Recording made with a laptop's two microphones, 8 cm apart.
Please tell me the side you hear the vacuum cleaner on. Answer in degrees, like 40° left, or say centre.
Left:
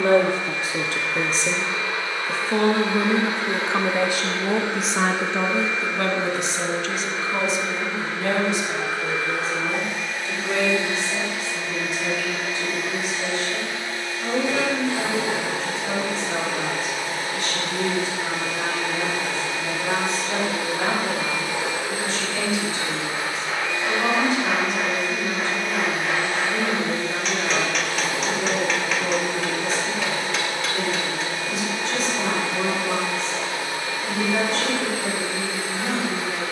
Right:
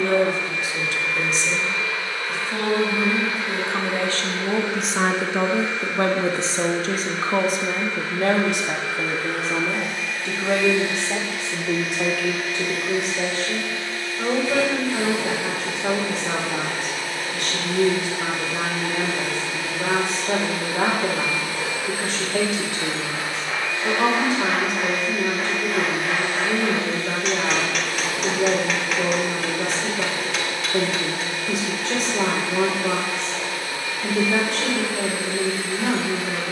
20° left.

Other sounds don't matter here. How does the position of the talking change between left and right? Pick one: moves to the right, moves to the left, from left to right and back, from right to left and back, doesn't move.
moves to the right.